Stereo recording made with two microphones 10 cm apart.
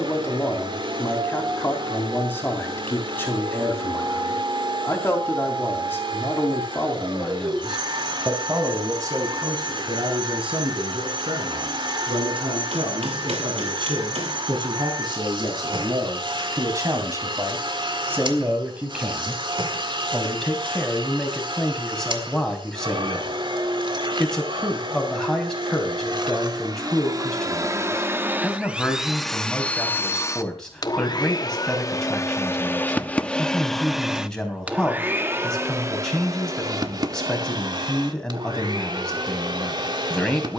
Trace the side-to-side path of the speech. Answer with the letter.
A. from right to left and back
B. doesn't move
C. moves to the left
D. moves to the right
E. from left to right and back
E.